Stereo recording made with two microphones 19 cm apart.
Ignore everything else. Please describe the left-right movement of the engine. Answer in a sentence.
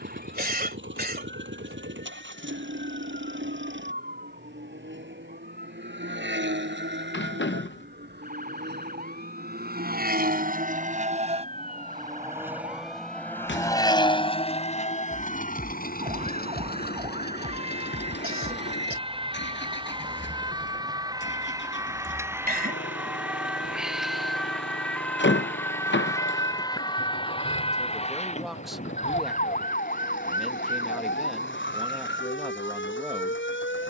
In this clip you hear the engine go from the right side to the left.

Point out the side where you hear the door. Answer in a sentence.
You can hear the door on the left.